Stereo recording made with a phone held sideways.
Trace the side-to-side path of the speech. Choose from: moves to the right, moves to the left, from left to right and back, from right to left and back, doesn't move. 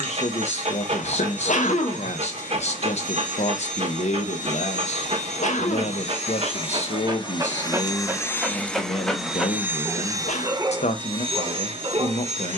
doesn't move.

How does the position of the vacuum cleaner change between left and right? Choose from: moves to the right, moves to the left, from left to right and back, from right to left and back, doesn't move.
moves to the right.